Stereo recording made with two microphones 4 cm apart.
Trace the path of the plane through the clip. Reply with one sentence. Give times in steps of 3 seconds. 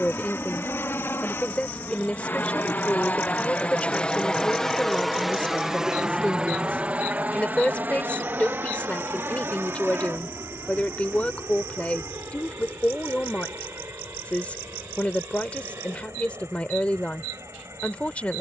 In this clip you hear the plane on the left from 0 s, in the centre from 3 s and on the right from 6 s.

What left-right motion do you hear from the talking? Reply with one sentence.
In this clip you hear the talking stay in one place.